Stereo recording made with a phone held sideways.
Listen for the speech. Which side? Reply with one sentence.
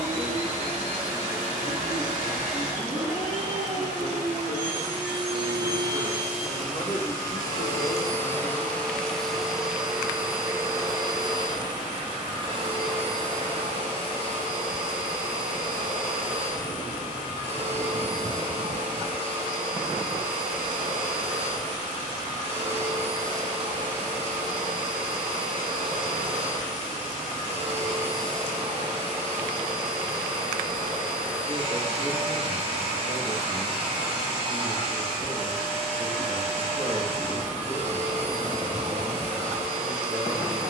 You can hear the speech on the right.